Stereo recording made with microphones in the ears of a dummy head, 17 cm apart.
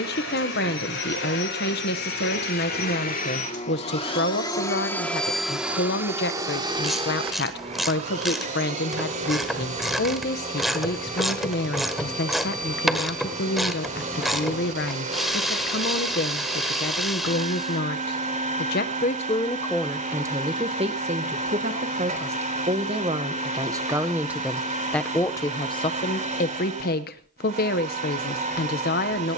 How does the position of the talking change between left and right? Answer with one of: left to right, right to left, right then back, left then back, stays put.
right then back.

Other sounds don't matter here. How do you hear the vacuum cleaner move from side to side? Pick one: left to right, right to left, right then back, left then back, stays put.
left to right.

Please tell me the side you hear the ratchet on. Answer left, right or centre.
centre.